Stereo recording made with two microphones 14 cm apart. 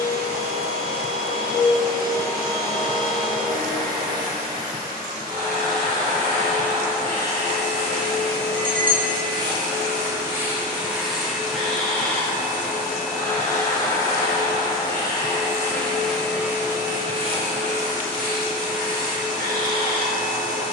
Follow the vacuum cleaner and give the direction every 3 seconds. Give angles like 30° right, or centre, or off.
70° right, 70° right, 50° right, 10° right, 20° left, 10° right, 70° right.